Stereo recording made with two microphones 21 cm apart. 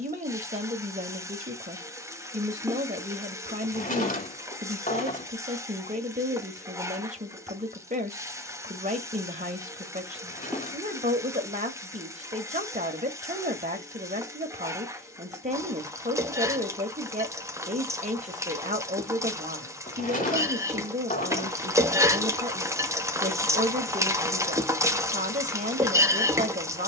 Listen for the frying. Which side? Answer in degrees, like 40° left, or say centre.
10° right.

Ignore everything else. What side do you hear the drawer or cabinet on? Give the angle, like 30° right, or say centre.
40° left.